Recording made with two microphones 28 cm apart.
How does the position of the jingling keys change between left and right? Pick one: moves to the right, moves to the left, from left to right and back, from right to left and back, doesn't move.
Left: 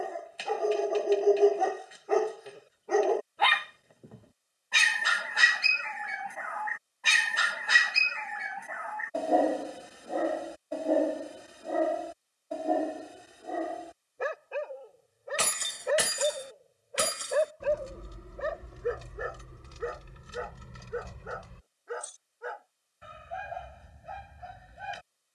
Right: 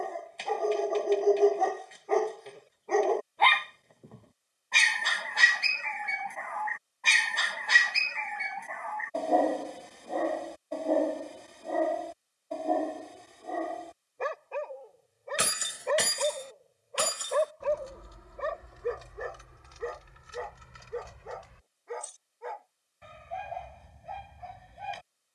moves to the left.